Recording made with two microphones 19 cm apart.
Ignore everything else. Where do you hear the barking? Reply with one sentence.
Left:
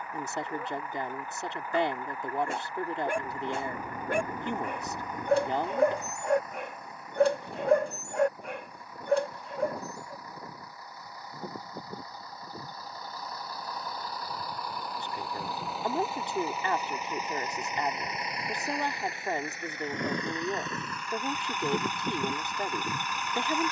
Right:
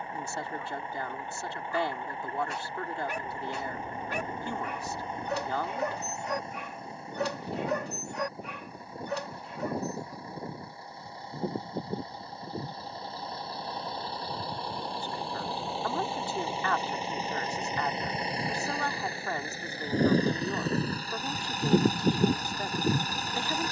In this clip you hear the barking on the left.